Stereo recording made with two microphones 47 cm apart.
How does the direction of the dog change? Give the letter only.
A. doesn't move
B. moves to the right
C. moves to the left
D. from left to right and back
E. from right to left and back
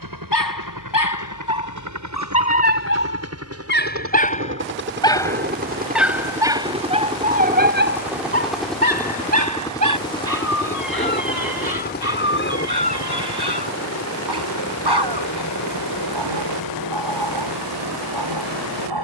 B.